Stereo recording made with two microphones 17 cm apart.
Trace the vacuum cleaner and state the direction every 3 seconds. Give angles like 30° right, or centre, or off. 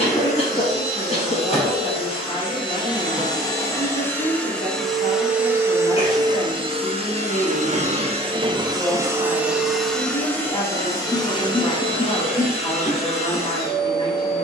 40° left, 10° left, 30° right, 10° left, 40° left.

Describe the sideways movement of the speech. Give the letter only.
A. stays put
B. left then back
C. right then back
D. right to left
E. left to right
A.